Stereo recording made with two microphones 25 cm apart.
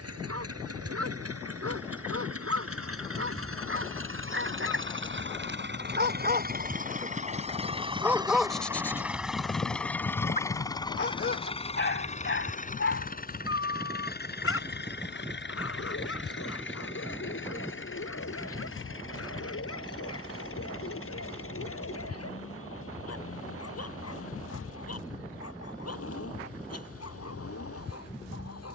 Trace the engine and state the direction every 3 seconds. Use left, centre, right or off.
right, right, right, centre, left, left, left, left, left, left.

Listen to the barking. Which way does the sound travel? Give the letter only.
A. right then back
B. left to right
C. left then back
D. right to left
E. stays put
D.